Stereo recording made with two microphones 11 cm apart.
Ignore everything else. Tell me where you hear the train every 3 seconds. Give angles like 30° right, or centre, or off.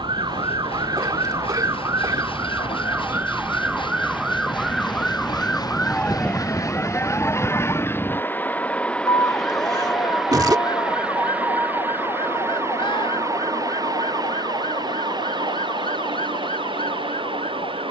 60° left, 50° left, 20° left, 10° right, 30° right, 50° right.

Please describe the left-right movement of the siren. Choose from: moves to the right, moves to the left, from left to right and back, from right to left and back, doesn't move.
moves to the left.